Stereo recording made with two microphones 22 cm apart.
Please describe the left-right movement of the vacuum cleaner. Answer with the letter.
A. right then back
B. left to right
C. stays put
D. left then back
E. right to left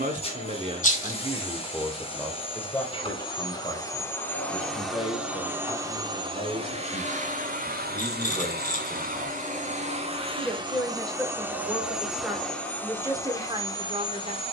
A.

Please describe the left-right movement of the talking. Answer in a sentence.
In this clip you hear the talking move from right to left and back again.